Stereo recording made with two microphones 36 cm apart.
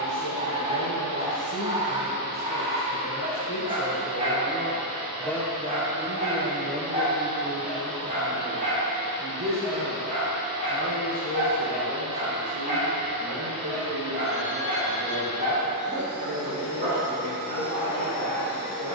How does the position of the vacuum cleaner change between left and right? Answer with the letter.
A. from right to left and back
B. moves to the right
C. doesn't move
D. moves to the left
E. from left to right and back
D.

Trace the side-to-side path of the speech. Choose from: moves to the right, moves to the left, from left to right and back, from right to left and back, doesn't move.
moves to the right.